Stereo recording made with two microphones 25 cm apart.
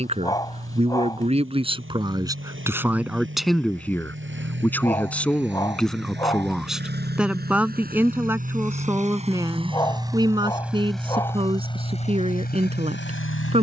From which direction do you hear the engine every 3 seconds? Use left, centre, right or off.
right, right, right, centre, left.